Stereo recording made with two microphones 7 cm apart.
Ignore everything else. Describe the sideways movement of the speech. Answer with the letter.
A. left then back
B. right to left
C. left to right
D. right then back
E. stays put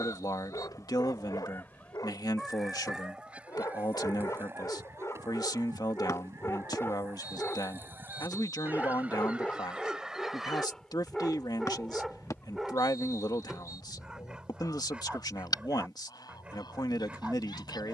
E.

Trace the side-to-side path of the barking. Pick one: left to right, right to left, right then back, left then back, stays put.
left to right.